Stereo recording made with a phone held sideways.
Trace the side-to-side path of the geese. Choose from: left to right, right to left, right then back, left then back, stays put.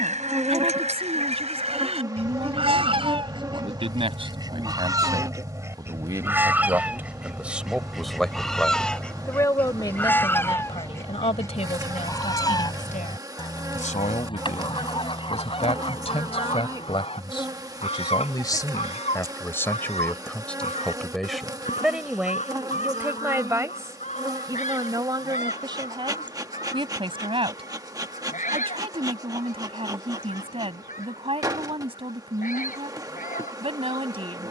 right to left.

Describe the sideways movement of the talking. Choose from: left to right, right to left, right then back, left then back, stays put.
left then back.